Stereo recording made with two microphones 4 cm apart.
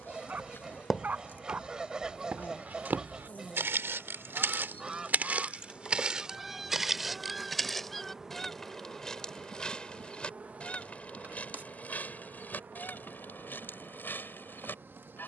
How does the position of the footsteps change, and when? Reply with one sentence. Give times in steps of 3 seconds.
In this clip you hear the footsteps on the right from 0 s, in the centre from 6 s and not at all from 9 s.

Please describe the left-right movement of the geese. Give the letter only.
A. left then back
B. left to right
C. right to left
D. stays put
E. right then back
C.